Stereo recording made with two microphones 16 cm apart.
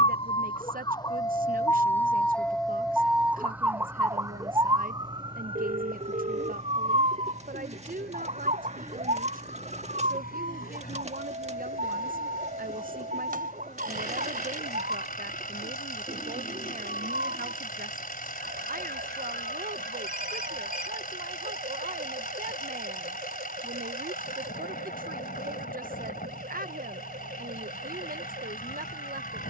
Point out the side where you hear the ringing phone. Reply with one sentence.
You can hear the ringing phone on the right.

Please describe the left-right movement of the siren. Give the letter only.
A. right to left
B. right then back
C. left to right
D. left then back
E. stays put
C.